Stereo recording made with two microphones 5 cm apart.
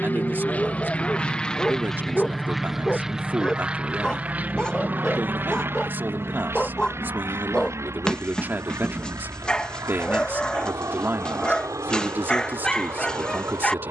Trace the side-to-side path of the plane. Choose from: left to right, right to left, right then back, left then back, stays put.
left to right.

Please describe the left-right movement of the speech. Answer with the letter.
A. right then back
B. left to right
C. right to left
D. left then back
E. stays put
E.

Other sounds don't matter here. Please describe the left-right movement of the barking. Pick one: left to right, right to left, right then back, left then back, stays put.
stays put.